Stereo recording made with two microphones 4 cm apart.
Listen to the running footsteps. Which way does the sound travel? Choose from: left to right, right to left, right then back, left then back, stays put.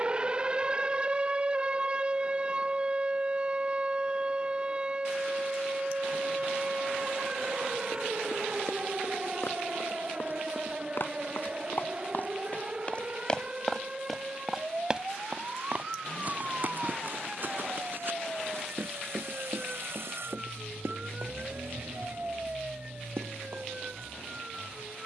left to right.